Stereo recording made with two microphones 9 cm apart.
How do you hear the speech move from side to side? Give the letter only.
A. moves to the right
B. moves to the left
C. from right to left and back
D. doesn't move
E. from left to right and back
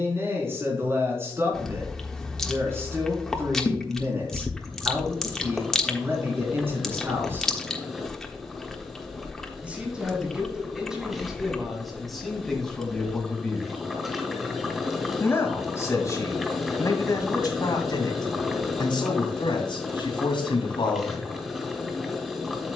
B.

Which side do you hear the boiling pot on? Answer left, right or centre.
centre.